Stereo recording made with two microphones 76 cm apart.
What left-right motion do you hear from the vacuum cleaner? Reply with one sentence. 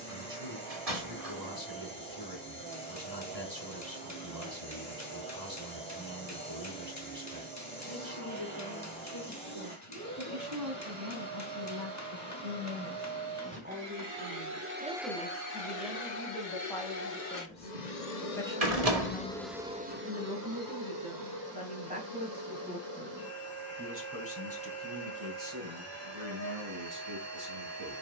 In this clip you hear the vacuum cleaner go left and come back.